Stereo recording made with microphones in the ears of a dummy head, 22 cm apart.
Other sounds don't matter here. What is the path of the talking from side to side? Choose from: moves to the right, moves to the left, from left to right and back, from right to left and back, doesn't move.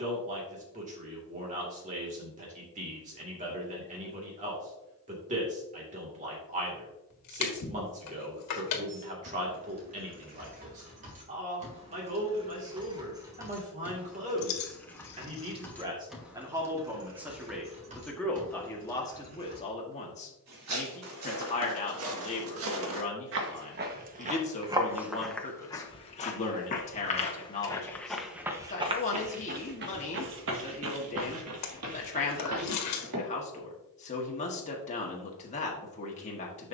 moves to the left.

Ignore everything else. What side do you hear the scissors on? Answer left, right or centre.
left.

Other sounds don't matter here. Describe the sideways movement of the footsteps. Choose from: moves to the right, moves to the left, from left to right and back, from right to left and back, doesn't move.
from right to left and back.